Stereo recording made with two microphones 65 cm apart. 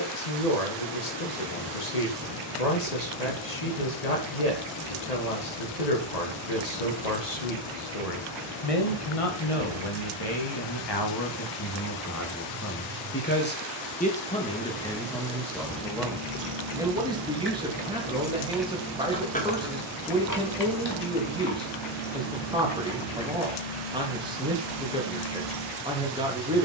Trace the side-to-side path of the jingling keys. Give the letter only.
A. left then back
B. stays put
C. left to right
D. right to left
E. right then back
D.